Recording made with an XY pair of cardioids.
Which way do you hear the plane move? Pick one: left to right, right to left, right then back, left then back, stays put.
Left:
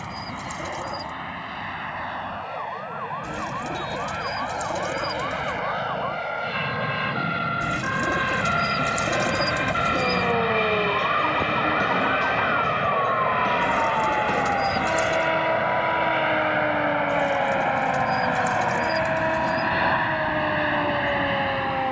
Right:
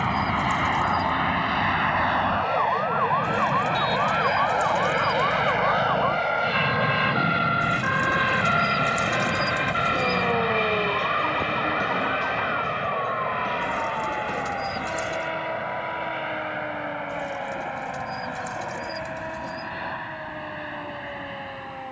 right to left.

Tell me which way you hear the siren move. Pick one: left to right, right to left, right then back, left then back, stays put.
right to left.